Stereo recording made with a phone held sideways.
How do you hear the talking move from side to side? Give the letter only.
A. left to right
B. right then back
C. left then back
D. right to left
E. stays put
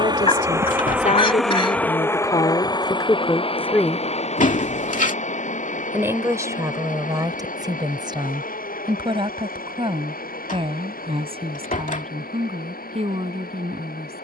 A.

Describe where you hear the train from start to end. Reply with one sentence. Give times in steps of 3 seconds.
In this clip you hear the train in the centre from 0 s and on the left from 3 s.